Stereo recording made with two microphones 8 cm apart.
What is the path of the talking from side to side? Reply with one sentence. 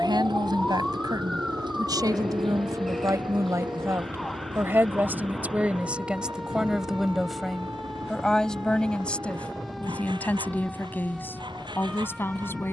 You can hear the talking move from right to left.